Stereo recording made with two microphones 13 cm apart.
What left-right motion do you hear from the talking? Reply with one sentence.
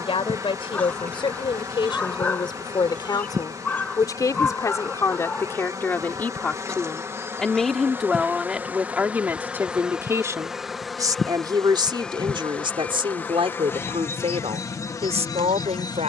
You can hear the talking travel towards the right.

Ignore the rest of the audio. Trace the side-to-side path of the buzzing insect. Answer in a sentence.
You can hear the buzzing insect move to the left.